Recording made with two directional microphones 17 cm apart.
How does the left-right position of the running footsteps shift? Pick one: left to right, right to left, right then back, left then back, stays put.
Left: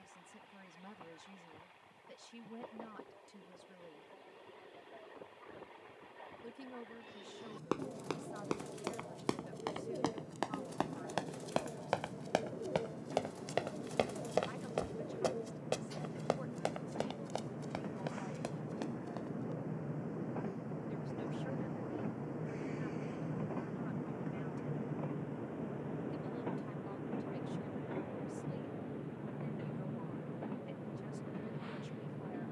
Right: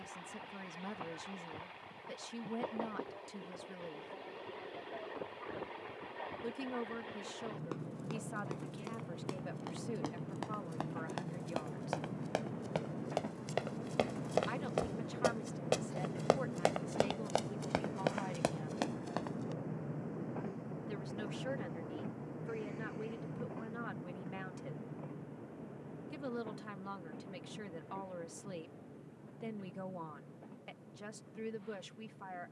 left to right.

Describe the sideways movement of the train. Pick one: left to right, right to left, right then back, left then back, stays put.
right to left.